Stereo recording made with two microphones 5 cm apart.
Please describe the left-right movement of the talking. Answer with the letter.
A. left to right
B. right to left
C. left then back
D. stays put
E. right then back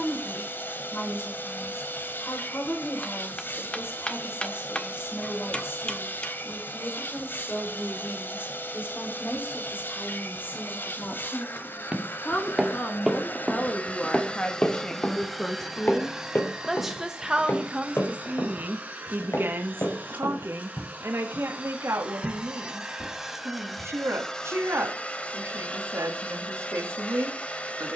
A.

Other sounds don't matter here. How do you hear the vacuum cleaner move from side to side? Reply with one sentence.
In this clip you hear the vacuum cleaner move from left to right and back again.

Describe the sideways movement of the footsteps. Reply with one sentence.
In this clip you hear the footsteps go from the right side to the left.